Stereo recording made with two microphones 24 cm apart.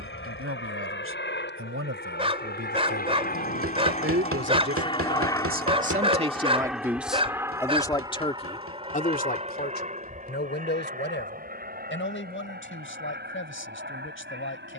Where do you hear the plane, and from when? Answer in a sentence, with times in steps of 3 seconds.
You can hear the plane on the left from 0 s, in the centre from 6 s and on the right from 9 s.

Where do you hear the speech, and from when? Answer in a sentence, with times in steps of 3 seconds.
You can hear the speech on the right from 0 s, in the centre from 6 s and on the left from 9 s.